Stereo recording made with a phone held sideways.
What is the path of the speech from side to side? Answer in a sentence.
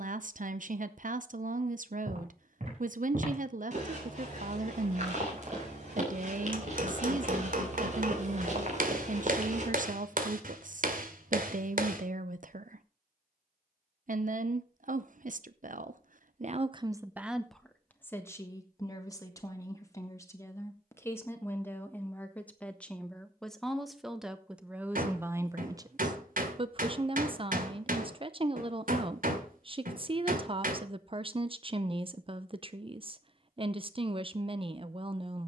In this clip you hear the speech go left and come back.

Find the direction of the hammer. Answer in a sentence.
In this clip you hear the hammer on the right.